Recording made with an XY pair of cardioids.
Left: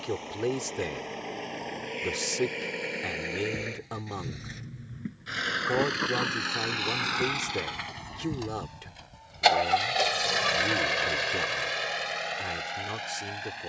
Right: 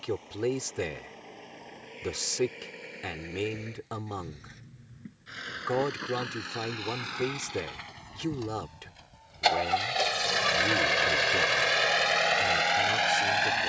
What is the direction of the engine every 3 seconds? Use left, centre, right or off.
left, left, left, centre, right.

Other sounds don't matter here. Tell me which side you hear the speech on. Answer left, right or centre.
centre.